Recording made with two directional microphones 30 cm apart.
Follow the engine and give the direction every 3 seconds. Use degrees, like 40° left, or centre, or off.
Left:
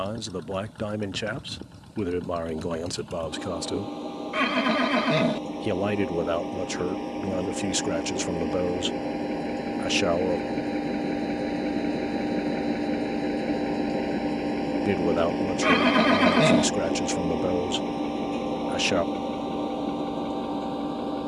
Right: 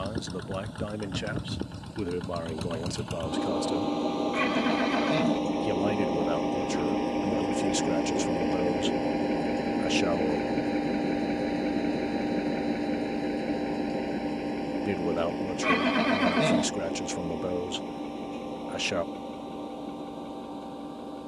50° right, 40° right, 20° right, centre, 20° left, 40° left, 60° left.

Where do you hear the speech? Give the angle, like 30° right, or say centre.
20° left.